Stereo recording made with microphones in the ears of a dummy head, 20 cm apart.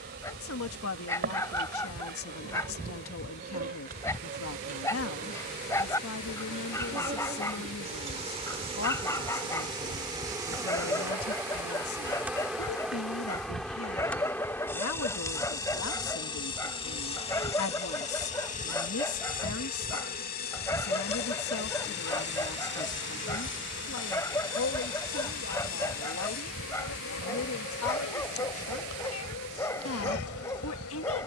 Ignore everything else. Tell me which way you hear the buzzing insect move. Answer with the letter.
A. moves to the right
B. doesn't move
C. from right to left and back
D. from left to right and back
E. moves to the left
E.